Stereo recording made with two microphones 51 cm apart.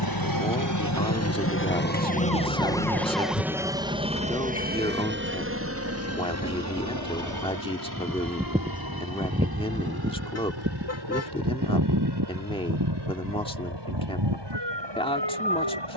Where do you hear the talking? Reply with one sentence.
You can hear the talking in the centre.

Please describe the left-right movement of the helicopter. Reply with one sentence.
You can hear the helicopter move to the right.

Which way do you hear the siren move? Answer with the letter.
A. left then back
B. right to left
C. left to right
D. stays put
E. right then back
C.